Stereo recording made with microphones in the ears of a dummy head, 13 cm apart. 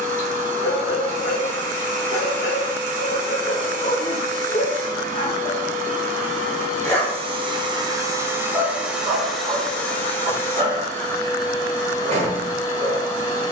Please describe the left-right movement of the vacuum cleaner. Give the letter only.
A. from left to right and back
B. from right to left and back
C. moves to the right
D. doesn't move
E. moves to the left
E.